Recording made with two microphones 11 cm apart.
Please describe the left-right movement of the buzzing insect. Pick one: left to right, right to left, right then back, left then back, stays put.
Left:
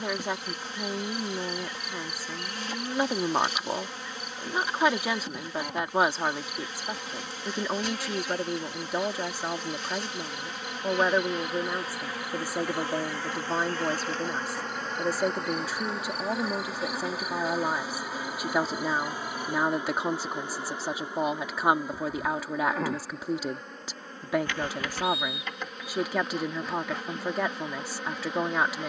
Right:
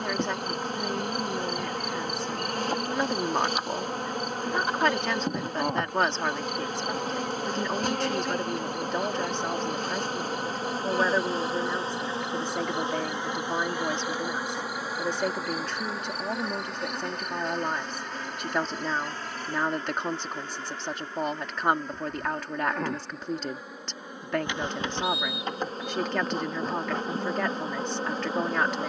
left then back.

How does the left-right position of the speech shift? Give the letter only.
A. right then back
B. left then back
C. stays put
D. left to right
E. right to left
C.